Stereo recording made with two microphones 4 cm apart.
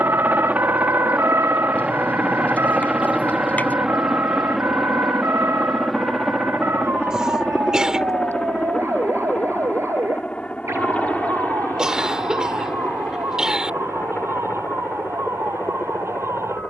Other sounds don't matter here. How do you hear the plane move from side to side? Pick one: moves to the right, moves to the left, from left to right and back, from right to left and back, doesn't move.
moves to the left.